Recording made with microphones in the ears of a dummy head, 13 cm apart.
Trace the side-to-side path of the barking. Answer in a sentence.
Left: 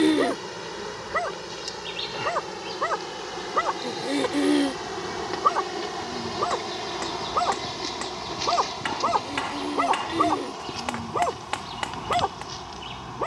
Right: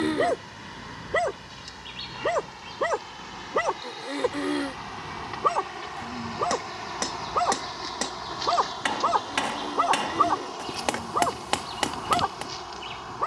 You can hear the barking move from right to left.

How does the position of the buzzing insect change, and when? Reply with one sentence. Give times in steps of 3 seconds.
In this clip you hear the buzzing insect on the left from 0 s and in the centre from 9 s.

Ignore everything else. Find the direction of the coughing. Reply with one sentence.
You can hear the coughing on the left.